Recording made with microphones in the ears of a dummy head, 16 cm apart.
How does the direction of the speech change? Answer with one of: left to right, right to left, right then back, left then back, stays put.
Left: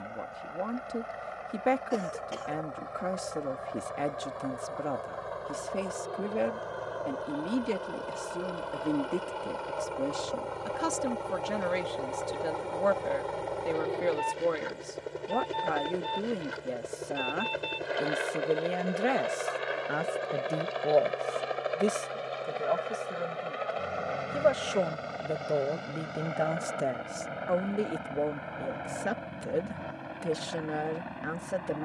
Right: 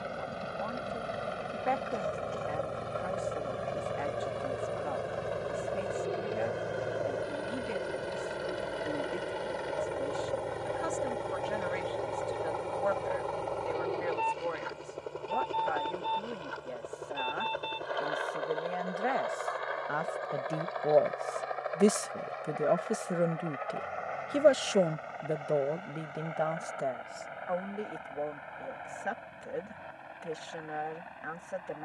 right then back.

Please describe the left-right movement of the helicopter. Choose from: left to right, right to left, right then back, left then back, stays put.
right to left.